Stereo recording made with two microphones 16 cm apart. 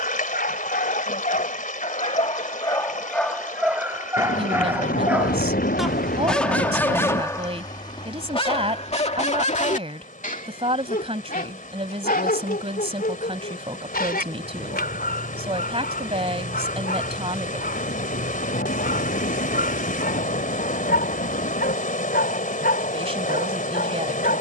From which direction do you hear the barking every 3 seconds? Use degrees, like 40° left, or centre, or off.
60° left, 10° right, 20° left, 60° left, 80° left, 80° left, 80° left, 80° left.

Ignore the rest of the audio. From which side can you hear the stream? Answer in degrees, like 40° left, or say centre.
60° left.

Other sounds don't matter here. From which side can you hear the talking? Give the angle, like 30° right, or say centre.
40° right.